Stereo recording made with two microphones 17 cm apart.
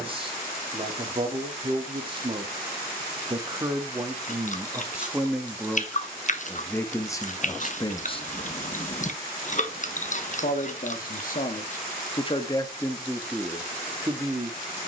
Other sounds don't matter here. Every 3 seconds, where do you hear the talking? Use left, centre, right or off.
right, centre, left, left, centre.